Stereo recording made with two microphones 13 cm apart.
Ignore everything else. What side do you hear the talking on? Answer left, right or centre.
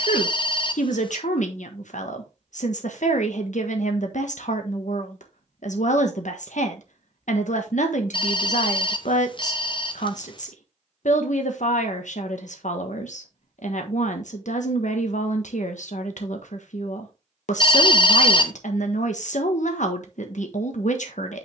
left.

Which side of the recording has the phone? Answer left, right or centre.
left.